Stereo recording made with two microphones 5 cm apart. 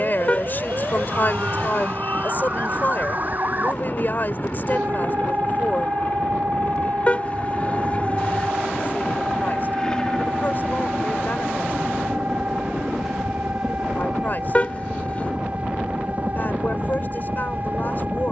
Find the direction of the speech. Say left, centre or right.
left.